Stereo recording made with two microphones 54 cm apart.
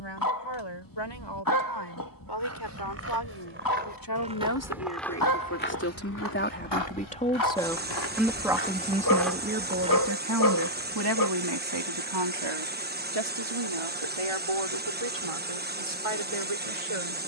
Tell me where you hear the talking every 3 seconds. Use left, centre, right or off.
left, left, centre, right, right, right.